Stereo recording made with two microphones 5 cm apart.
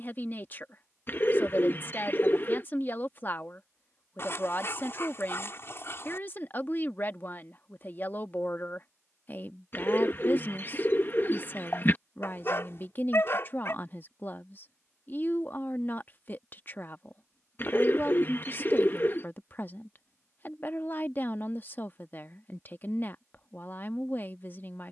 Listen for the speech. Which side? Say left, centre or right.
left.